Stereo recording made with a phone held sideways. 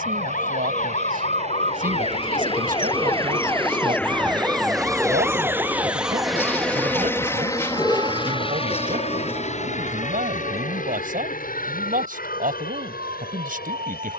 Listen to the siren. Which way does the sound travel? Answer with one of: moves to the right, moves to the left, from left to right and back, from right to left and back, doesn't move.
moves to the right.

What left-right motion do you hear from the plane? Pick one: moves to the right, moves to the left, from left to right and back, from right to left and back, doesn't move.
moves to the left.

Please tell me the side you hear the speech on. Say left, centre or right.
right.